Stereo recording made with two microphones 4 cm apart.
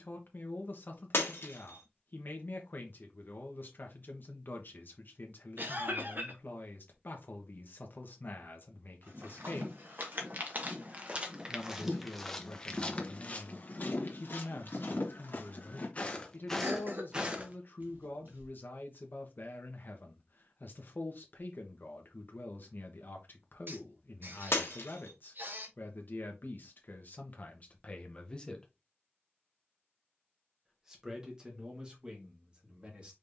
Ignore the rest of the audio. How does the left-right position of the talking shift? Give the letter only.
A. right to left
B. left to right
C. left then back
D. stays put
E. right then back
B.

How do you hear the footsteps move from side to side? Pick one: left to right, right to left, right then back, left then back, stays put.
left then back.